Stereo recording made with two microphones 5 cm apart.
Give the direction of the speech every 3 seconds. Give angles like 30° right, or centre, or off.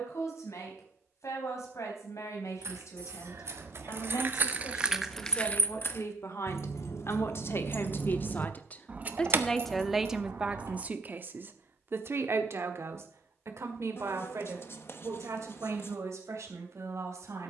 80° left, 70° left, 50° left, 20° right, 60° right, 70° right.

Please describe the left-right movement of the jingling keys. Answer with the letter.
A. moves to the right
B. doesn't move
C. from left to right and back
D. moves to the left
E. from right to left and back
E.